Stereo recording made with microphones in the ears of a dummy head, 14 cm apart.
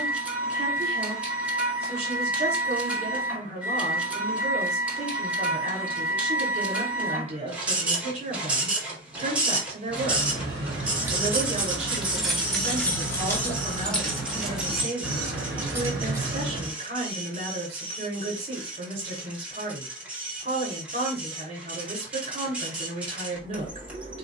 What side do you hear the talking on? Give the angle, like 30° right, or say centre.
40° right.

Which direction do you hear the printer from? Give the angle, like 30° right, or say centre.
10° right.